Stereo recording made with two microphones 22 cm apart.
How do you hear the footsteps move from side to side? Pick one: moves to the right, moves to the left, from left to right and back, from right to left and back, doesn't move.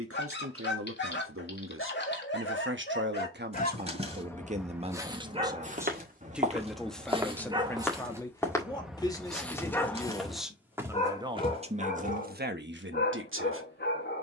from right to left and back.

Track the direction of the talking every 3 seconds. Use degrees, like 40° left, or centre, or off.
70° right, 30° right, 10° left, centre, 60° right.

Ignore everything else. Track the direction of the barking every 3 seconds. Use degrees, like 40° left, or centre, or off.
50° left, centre, 20° right, 20° left, 50° left.